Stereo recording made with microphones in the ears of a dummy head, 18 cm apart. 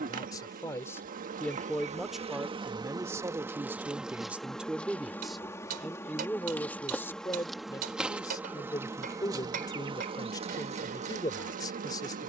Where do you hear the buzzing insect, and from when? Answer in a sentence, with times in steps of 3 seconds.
You can hear the buzzing insect on the right from 0 s, in the centre from 3 s and on the right from 9 s.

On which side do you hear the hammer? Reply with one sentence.
In this clip you hear the hammer on the right.